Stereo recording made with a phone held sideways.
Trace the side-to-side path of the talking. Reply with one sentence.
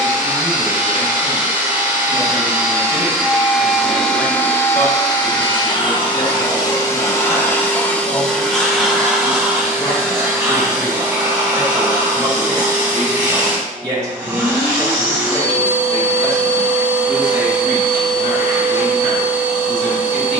In this clip you hear the talking move from left to right and back again.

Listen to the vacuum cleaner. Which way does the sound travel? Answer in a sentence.
You can hear the vacuum cleaner move from right to left and back again.